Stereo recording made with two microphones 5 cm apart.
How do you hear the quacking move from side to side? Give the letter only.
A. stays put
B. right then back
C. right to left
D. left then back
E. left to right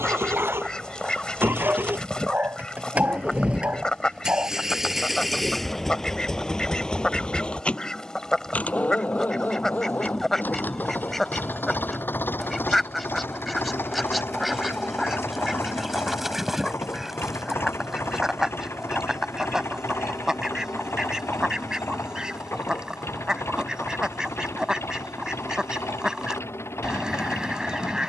E.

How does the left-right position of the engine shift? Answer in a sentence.
In this clip you hear the engine travel towards the left.